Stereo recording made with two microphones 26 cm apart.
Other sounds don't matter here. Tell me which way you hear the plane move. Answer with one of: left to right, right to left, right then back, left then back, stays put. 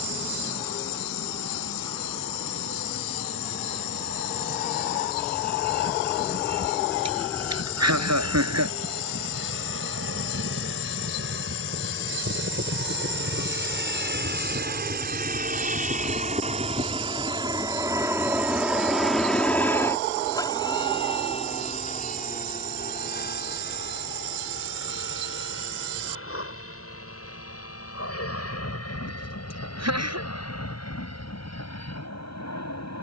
right to left.